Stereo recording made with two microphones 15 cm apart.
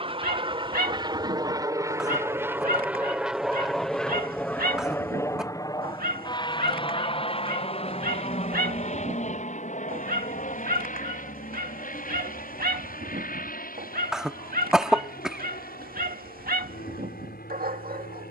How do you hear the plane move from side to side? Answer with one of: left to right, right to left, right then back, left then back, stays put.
right to left.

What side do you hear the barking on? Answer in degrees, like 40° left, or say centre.
80° right.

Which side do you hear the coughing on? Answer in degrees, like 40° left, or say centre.
centre.